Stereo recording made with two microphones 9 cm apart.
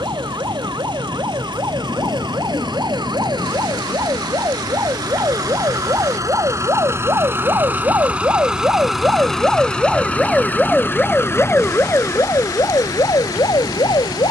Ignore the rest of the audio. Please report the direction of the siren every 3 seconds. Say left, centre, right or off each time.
right, right, right, centre, left.